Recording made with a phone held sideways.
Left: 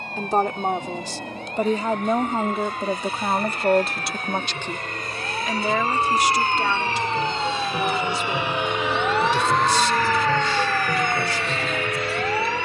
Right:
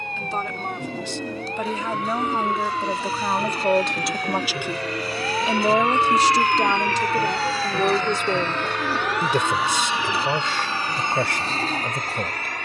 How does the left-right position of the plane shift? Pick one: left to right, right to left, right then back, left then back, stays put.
left to right.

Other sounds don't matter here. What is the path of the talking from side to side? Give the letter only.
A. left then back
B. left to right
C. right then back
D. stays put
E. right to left
B.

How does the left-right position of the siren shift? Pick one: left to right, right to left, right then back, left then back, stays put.
right to left.